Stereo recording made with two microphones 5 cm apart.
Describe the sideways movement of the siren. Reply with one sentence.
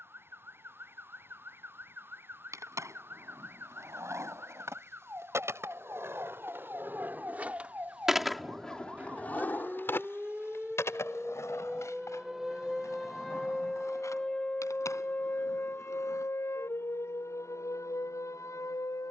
In this clip you hear the siren move to the left.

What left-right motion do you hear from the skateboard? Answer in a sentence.
In this clip you hear the skateboard go from the right side to the left.